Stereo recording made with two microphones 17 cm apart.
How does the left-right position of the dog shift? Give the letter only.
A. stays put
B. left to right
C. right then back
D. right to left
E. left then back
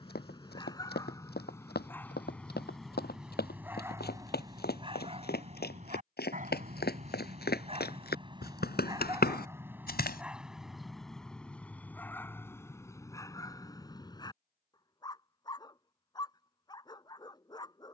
C.